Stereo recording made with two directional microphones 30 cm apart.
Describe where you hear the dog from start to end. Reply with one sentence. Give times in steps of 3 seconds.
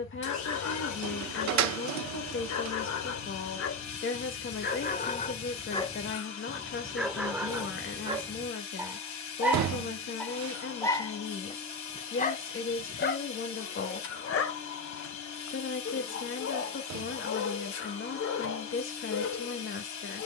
You can hear the dog on the left from 0 s, in the centre from 6 s and on the left from 12 s.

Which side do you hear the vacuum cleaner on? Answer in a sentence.
In this clip you hear the vacuum cleaner on the left.